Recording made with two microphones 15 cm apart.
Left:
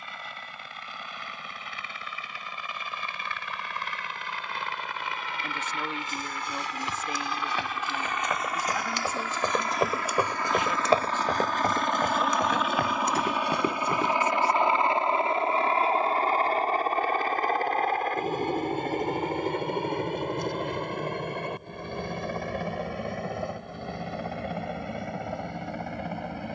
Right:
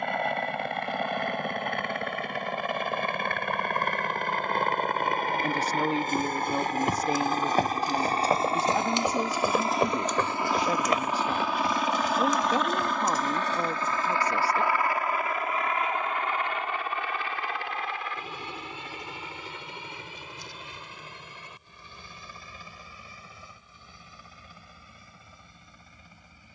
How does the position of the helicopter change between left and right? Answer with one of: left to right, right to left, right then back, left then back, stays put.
right to left.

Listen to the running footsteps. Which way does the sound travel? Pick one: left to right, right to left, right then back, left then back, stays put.
right to left.